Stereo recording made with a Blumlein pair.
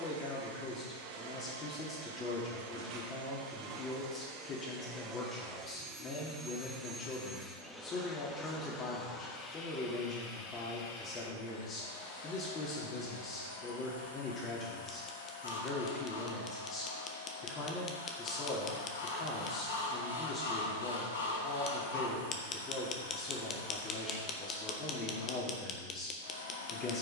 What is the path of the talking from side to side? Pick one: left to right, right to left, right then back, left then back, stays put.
stays put.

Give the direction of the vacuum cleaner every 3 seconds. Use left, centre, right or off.
right, right, centre, left, left, left, left, left, left.